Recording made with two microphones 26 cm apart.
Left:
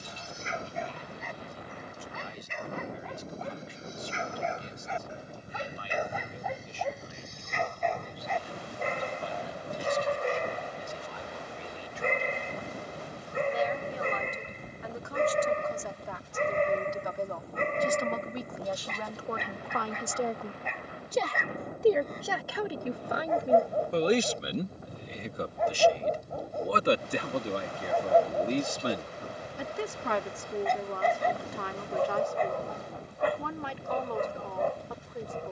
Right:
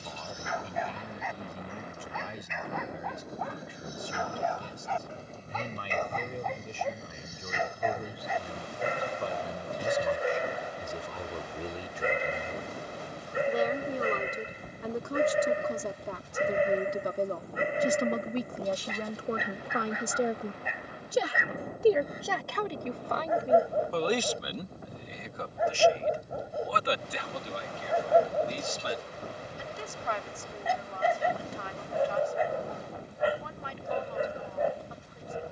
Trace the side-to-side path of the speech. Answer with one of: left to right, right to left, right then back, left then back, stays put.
right to left.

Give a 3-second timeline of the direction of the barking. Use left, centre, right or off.
left, left, centre, centre, centre, centre, centre, centre, centre, centre, centre, centre.